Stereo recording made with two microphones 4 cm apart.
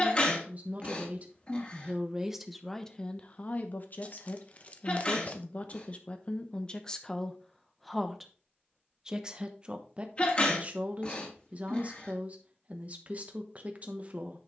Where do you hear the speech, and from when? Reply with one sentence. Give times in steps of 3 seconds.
In this clip you hear the speech on the right from 0 s, on the left from 3 s, in the centre from 6 s and on the right from 9 s.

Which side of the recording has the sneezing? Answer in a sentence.
In this clip you hear the sneezing on the left.